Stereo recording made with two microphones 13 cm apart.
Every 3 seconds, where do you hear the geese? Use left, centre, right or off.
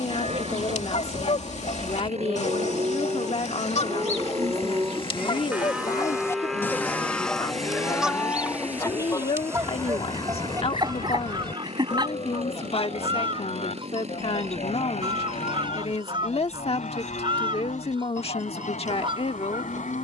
left, left, centre, right, right, right, right.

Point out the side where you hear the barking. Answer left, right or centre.
right.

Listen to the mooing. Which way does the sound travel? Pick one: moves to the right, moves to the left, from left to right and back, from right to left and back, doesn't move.
moves to the left.